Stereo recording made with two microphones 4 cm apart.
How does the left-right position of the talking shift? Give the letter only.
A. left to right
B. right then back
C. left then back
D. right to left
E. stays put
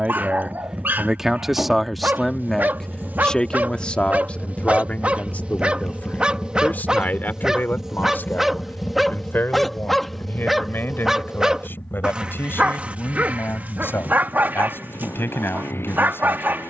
D.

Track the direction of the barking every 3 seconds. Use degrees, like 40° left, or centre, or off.
60° right, 40° right, 10° right, centre, 40° right, 60° right.